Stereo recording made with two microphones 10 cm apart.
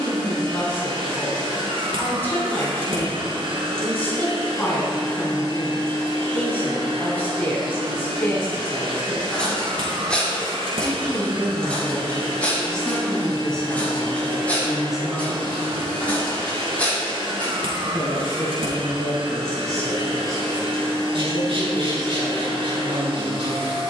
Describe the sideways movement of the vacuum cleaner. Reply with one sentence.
In this clip you hear the vacuum cleaner stay put.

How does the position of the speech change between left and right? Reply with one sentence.
You can hear the speech move from left to right.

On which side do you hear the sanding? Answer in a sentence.
You can hear the sanding on the right.